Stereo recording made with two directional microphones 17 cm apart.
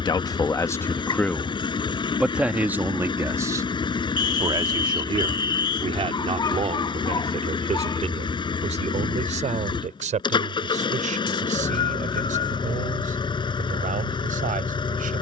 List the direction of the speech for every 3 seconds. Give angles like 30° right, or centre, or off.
10° left, 20° right, 40° right, 50° right, 50° right.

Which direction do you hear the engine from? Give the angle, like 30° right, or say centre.
30° left.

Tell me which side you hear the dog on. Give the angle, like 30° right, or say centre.
30° left.